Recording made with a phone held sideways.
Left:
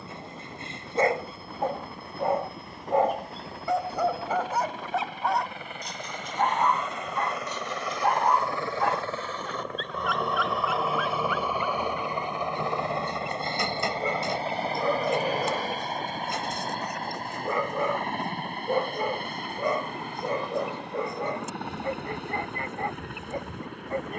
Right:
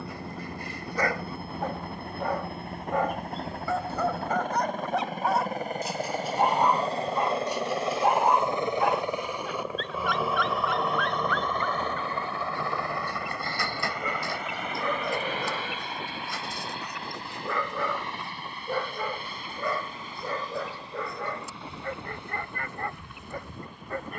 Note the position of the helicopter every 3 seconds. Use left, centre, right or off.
right, right, right, centre, left, left, left, left.